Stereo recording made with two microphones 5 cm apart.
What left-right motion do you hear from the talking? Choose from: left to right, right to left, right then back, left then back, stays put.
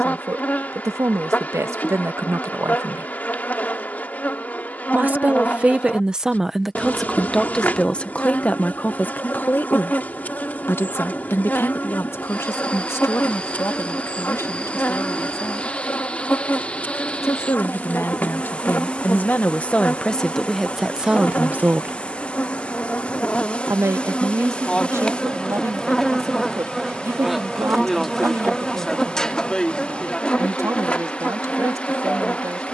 left then back.